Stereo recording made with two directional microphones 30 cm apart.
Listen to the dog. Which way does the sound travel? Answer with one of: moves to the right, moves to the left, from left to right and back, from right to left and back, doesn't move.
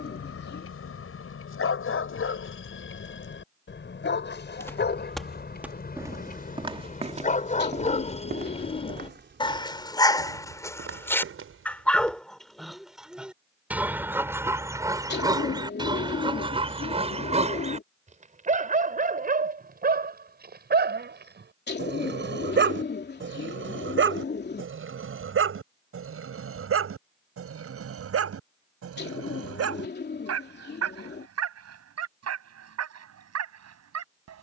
moves to the right.